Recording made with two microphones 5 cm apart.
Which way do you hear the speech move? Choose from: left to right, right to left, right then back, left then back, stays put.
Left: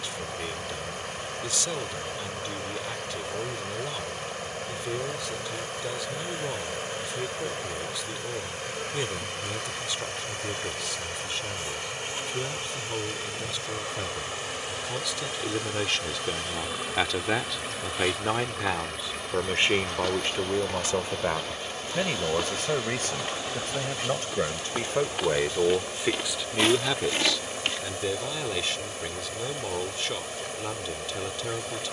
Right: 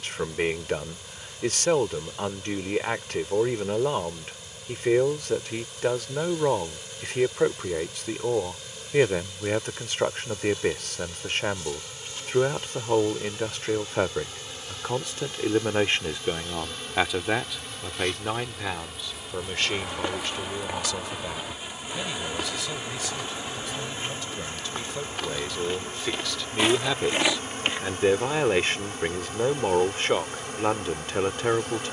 left then back.